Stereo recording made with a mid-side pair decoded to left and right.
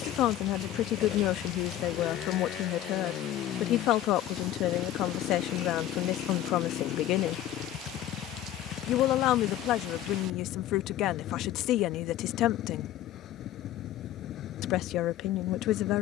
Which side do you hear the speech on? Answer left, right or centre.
left.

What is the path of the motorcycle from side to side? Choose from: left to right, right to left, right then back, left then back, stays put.
stays put.